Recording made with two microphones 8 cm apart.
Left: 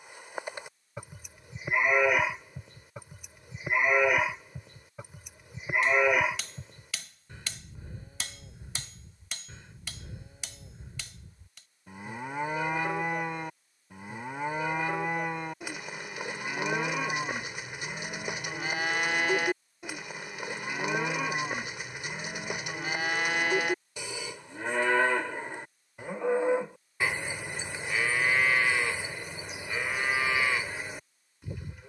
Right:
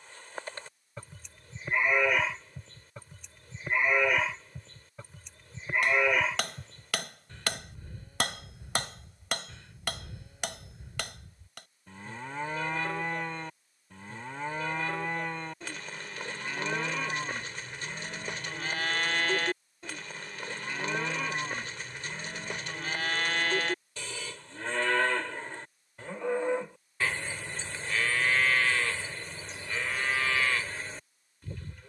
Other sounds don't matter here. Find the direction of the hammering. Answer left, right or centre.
right.